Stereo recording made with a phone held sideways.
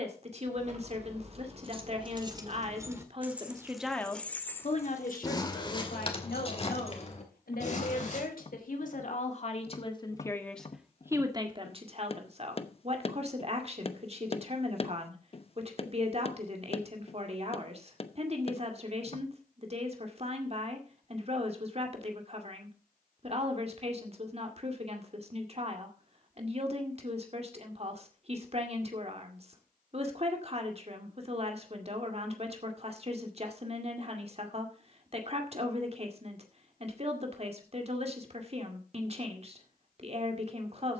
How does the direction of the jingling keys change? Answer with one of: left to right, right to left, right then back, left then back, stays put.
right to left.